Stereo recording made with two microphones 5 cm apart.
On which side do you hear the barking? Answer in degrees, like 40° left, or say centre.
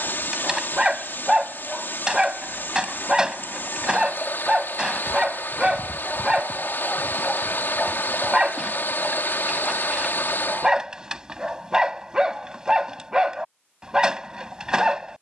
10° right.